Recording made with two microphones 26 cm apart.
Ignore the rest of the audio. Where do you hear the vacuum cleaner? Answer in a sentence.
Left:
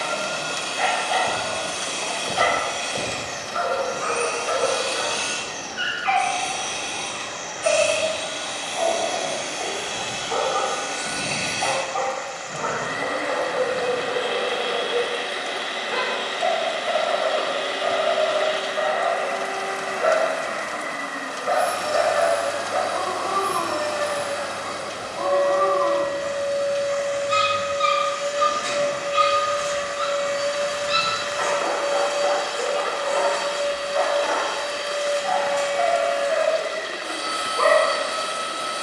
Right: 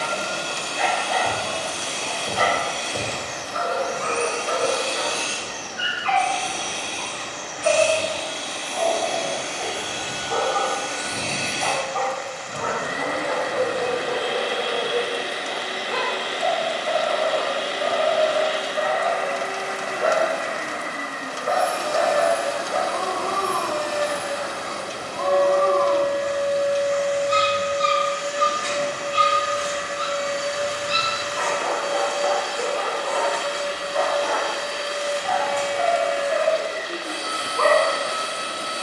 In this clip you hear the vacuum cleaner on the right.